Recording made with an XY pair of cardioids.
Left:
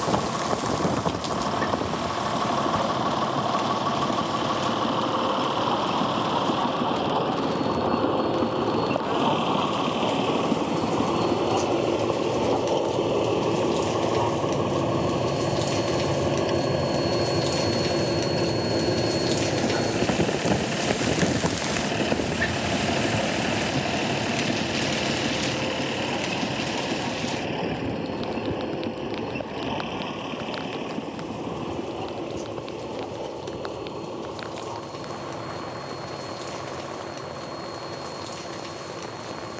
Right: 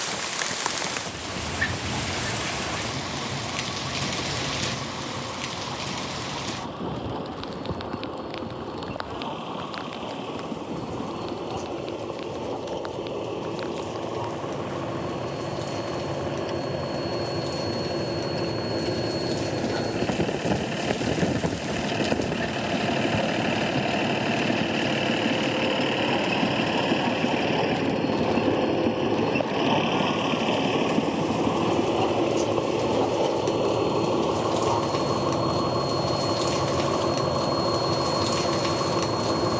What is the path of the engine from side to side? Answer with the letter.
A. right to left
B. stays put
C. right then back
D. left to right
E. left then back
D.